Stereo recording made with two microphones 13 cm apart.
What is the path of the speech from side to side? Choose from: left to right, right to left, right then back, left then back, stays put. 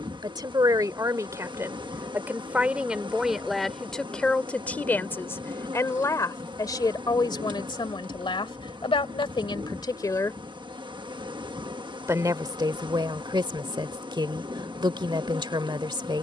left then back.